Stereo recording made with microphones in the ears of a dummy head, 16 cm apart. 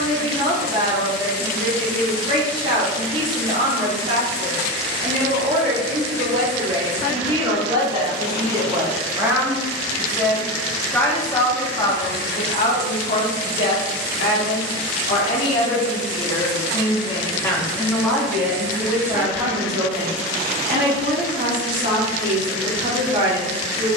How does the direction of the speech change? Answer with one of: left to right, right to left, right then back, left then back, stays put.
left then back.